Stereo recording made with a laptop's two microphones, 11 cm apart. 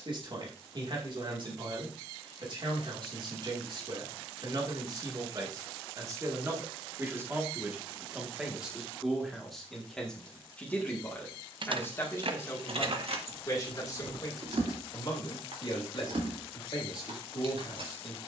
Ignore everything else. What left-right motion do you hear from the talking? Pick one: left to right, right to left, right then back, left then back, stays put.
right to left.